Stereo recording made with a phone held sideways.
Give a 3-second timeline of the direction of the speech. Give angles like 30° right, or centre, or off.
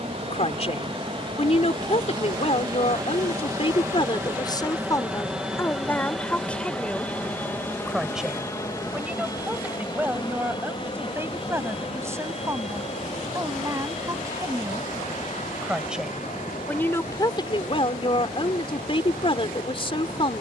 40° left, 30° left, centre, 10° right, 20° right, 20° left, 40° left.